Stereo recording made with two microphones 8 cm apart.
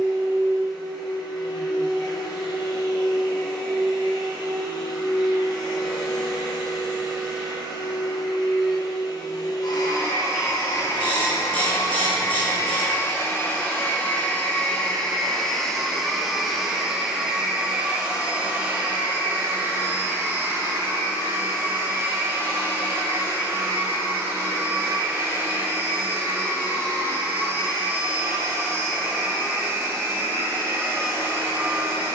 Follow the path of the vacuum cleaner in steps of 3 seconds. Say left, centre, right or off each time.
left, left, left, left, left, centre, right, right, right, right, right.